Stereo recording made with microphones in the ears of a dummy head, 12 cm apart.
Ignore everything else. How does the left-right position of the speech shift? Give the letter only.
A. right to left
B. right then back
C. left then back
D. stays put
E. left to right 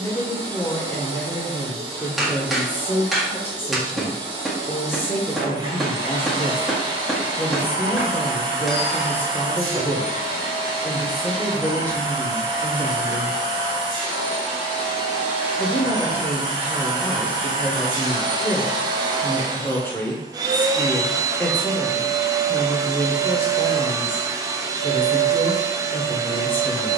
D.